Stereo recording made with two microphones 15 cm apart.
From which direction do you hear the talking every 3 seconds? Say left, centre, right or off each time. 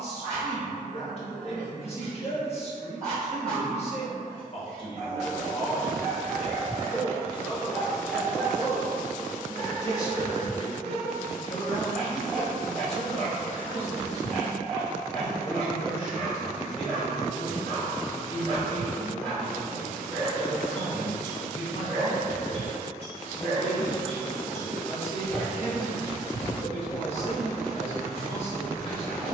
left, left, centre, left, left, left, left, left, left, left.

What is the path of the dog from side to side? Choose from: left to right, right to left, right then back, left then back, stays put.
stays put.